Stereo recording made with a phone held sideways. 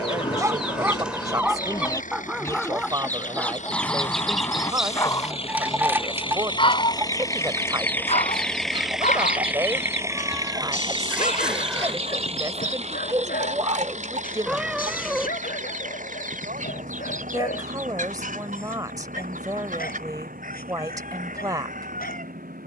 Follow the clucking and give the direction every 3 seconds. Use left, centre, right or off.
left, centre, right, right, right, right, right, right.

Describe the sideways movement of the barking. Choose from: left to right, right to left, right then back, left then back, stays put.
right to left.